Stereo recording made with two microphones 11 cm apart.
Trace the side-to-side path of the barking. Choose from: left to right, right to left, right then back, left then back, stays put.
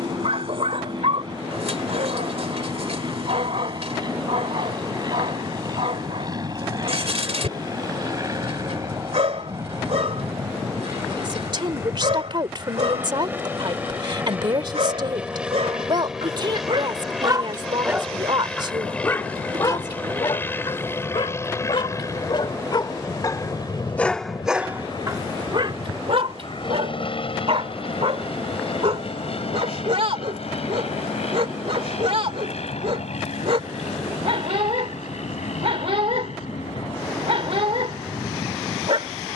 left then back.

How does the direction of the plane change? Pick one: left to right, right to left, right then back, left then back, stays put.
right to left.